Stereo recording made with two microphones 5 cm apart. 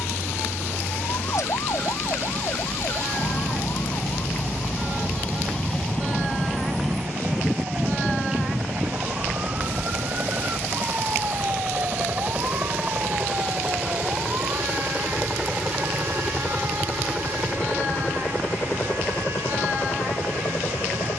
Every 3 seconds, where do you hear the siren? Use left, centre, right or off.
left, left, centre, right, right, right, right.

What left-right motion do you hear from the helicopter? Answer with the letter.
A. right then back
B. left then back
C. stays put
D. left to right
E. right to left
E.